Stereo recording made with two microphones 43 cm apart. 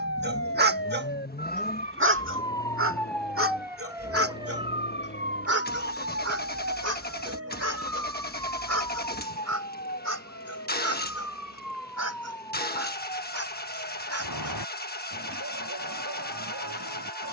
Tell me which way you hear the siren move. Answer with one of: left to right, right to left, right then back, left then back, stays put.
left to right.